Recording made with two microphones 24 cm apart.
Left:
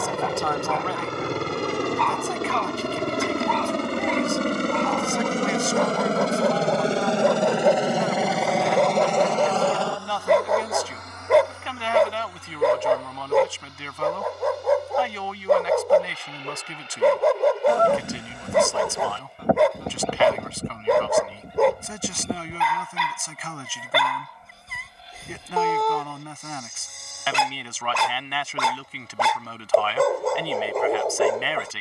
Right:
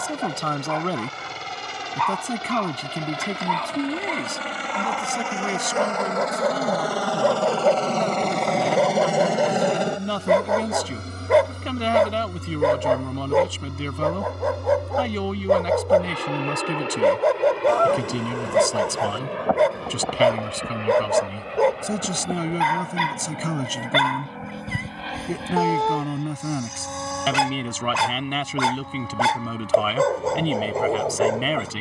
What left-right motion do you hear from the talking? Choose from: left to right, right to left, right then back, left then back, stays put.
stays put.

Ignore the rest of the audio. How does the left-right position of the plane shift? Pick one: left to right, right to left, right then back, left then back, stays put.
left to right.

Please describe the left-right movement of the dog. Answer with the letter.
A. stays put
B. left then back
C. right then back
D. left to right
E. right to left
A.